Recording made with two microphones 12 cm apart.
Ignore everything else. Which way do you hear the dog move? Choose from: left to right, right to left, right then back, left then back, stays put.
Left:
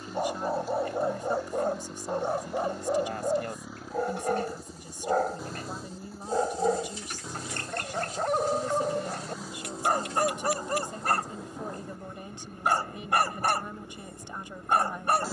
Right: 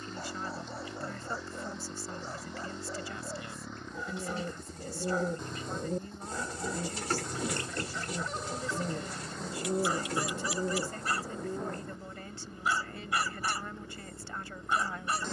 stays put.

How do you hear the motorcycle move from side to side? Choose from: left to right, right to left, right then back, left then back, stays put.
stays put.